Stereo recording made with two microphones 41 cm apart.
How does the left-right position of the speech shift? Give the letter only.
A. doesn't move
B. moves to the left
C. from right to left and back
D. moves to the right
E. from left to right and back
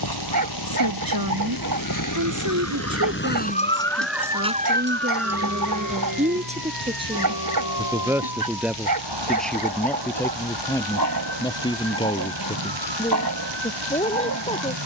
B.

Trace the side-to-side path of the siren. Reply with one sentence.
You can hear the siren move to the right.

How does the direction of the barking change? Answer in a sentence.
You can hear the barking stay put.